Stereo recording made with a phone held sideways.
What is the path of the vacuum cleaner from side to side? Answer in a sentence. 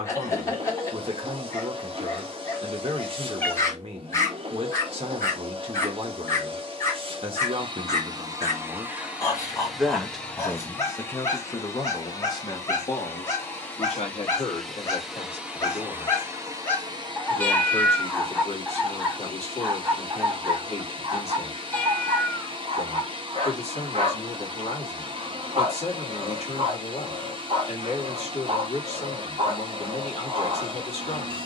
You can hear the vacuum cleaner go left and come back.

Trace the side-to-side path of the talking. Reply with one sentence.
You can hear the talking move to the left.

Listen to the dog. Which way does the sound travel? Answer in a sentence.
You can hear the dog move to the right.